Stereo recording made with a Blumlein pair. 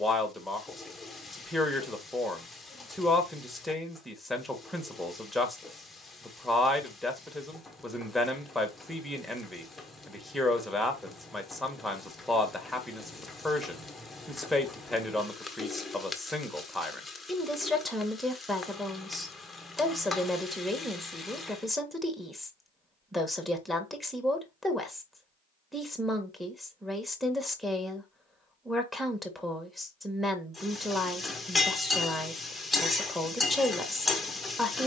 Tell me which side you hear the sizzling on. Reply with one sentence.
In this clip you hear the sizzling in the centre.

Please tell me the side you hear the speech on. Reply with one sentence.
You can hear the speech in the centre.